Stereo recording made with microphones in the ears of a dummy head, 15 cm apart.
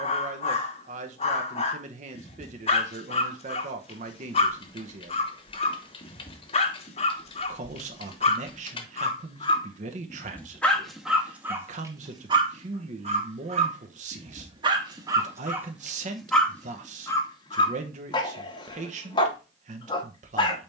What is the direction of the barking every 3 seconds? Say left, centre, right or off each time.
left, left, left, centre, right, centre, left.